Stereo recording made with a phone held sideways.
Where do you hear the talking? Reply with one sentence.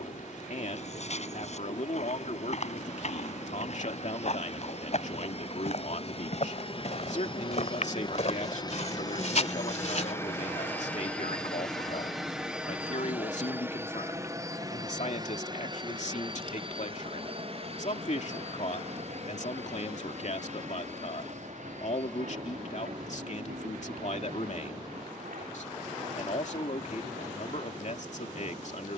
You can hear the talking on the left.